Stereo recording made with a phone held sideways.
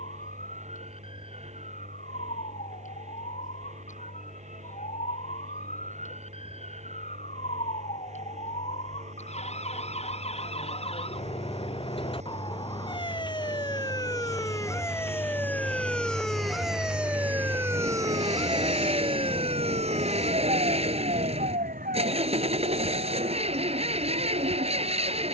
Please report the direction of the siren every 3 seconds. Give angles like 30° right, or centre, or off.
60° left, 60° left, 50° left, 40° left, 30° left, centre, 40° right, 60° right, 70° right.